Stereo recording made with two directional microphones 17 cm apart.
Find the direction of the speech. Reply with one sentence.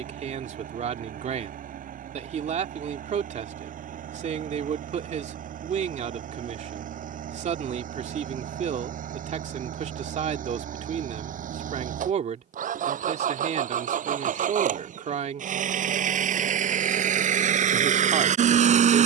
In this clip you hear the speech on the right.